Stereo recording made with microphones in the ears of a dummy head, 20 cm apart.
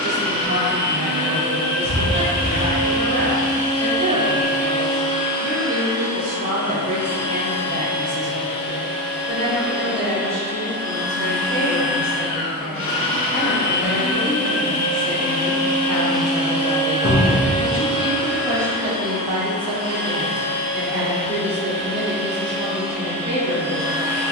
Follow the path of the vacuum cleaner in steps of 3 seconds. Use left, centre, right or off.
left, left, left, left, left, centre, right, right.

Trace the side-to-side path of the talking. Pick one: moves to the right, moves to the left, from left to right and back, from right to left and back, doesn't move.
from right to left and back.